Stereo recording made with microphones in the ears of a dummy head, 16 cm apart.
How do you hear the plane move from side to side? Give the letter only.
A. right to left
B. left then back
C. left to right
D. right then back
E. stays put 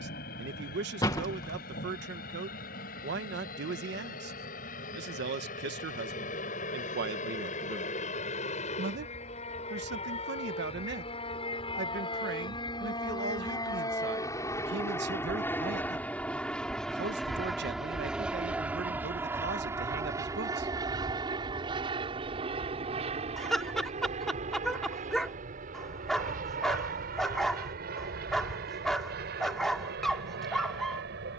C.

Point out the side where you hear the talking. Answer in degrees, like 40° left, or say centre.
70° right.